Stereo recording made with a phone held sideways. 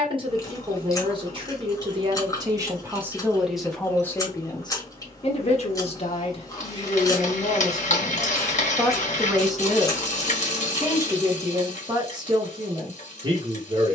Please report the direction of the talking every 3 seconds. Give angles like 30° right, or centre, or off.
30° right, 20° left, 30° left, 10° right, 30° right.